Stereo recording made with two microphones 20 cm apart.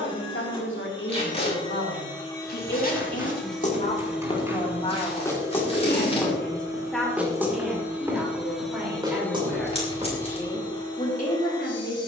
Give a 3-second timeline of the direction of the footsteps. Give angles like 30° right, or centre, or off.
50° left, 20° left, 10° right, 30° right.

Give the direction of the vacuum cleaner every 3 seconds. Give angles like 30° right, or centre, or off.
20° left, 10° right, 10° right, 20° left.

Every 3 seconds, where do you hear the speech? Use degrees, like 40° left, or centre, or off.
70° left, 30° left, centre, 30° left.